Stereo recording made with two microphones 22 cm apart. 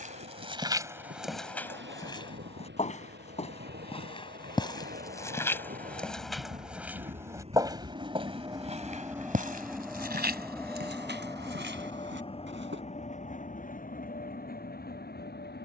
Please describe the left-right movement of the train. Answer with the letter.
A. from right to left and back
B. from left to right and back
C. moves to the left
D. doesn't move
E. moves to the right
C.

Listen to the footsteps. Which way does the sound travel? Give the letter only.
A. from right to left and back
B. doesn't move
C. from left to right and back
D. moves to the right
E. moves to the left
A.